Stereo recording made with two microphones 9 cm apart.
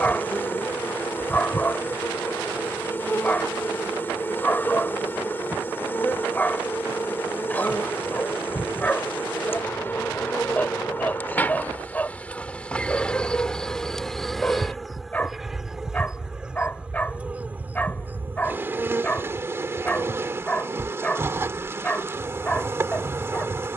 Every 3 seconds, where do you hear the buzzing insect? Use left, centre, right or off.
left, left, left, left, centre, centre, right, right.